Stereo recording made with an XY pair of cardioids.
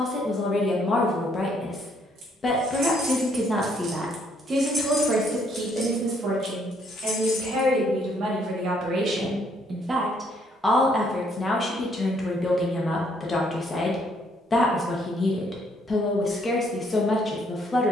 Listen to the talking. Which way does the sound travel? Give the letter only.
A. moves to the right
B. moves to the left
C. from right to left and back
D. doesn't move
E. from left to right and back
E.